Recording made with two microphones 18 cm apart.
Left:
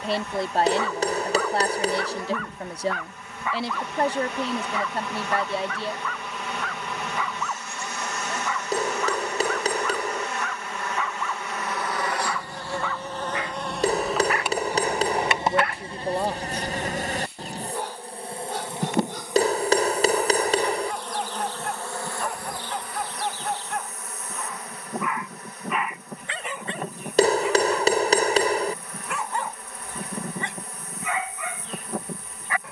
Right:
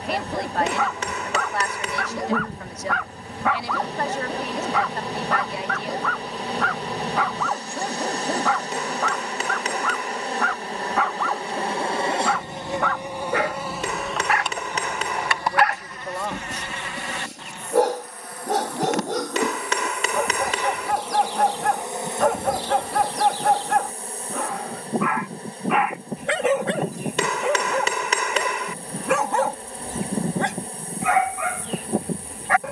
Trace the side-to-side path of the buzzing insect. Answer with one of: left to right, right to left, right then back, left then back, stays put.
left then back.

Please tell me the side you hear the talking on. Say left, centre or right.
left.